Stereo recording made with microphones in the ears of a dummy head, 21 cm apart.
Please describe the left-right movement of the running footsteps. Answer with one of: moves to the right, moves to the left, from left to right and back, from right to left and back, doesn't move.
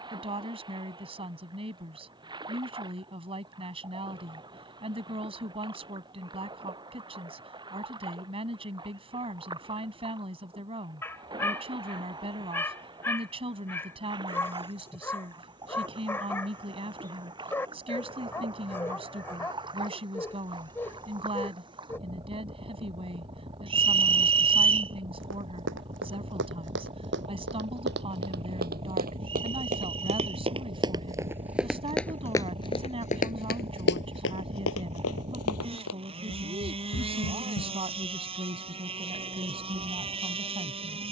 moves to the left.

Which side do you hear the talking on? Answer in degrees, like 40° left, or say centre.
20° right.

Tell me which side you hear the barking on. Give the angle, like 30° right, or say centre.
10° left.